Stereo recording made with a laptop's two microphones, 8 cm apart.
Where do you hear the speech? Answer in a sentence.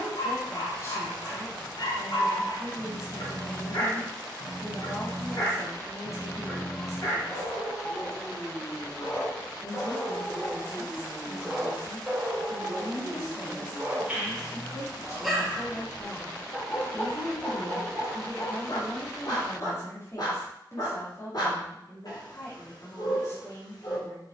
In this clip you hear the speech on the left.